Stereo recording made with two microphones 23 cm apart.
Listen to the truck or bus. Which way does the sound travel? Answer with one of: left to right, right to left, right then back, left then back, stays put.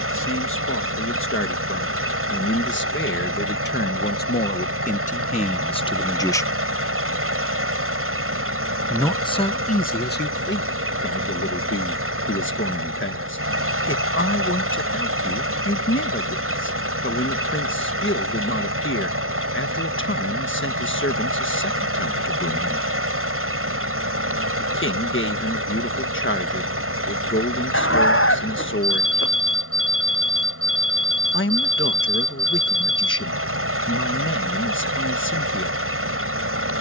stays put.